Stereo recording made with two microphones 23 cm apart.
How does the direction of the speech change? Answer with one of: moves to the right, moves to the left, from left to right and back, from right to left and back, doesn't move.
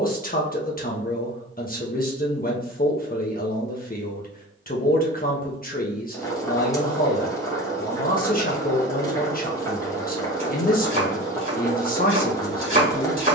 doesn't move.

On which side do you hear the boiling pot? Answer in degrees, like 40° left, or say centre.
10° left.